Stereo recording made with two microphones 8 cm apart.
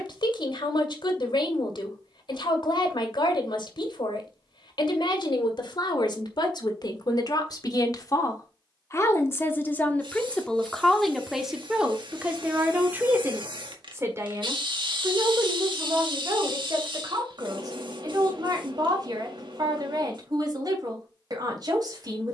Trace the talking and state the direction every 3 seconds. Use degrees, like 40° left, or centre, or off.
70° left, 70° left, 50° left, 10° left, 20° right, 40° right, 50° right, 50° right.